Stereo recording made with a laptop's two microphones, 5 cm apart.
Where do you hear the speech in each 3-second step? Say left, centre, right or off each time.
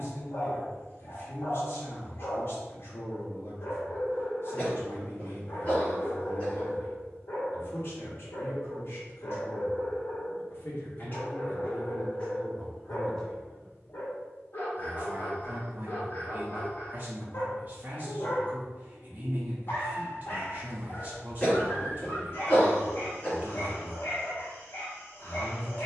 left, left, left, left, centre, right, right, right, right.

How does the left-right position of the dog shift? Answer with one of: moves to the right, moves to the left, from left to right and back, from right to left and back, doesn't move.
doesn't move.